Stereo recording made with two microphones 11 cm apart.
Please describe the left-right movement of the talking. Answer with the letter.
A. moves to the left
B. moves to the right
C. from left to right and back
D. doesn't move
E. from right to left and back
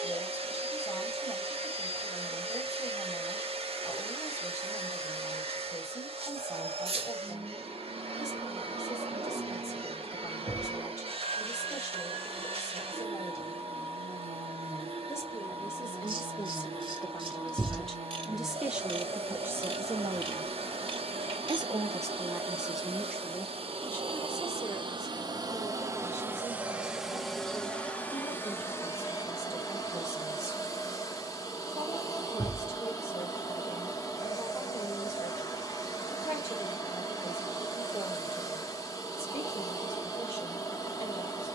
C.